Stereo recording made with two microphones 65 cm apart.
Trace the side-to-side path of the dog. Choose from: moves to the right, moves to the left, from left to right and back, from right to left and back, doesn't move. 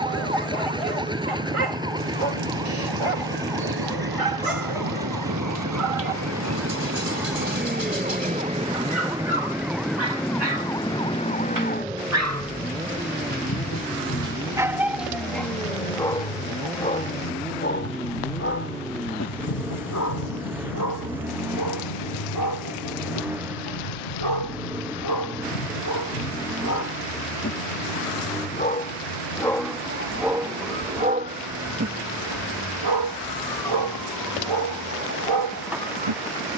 from right to left and back.